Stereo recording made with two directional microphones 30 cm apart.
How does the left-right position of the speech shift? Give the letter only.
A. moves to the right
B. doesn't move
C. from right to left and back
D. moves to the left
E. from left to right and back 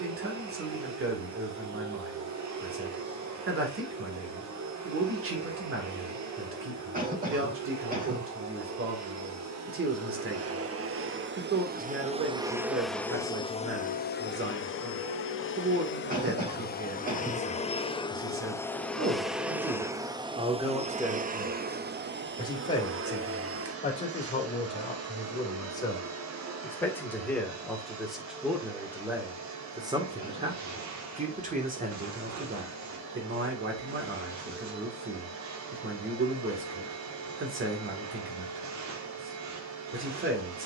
C.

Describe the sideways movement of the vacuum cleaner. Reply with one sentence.
In this clip you hear the vacuum cleaner go left and come back.